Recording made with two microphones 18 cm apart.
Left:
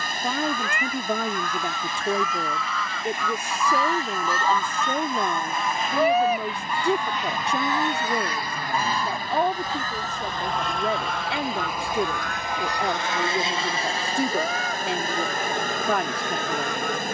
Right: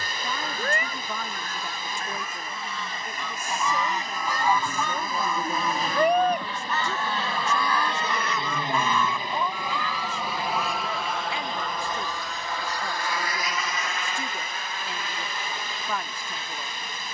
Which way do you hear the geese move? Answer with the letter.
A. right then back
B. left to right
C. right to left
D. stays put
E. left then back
C.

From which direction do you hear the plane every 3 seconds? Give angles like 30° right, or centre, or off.
50° right, 40° right, 30° right, 10° right, 30° left, 50° left.